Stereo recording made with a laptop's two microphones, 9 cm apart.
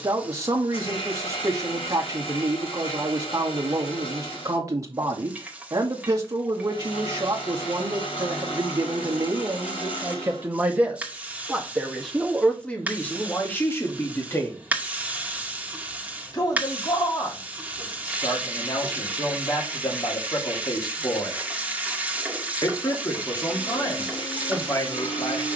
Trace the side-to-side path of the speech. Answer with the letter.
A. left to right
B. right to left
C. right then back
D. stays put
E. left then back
B.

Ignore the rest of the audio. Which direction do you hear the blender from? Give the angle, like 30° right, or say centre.
80° left.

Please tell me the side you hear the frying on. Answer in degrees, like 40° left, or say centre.
20° right.